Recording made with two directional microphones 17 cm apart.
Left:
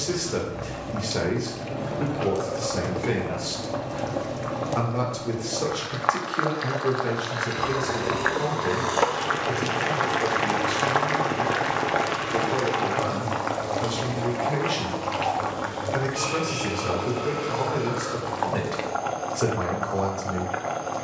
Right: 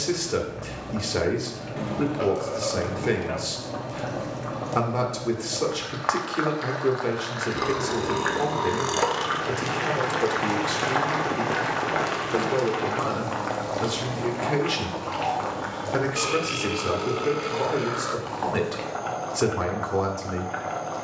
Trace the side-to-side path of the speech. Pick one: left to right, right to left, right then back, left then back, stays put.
stays put.